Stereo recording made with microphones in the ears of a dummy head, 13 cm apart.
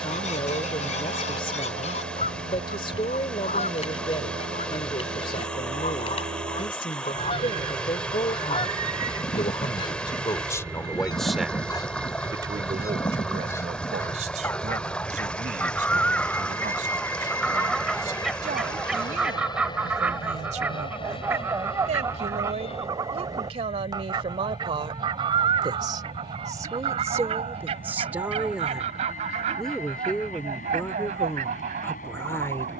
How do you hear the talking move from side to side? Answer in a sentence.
In this clip you hear the talking move from left to right and back again.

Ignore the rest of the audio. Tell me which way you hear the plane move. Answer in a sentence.
In this clip you hear the plane move from right to left.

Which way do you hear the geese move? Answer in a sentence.
In this clip you hear the geese move from left to right.